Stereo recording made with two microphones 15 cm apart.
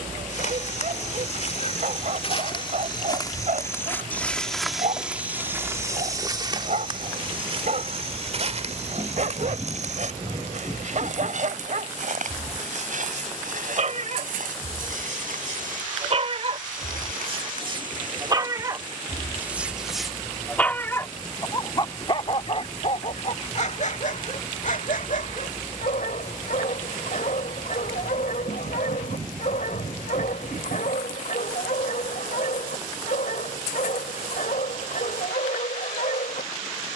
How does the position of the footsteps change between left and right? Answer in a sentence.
In this clip you hear the footsteps go from the left side to the right.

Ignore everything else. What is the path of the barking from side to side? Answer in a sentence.
In this clip you hear the barking travel towards the left.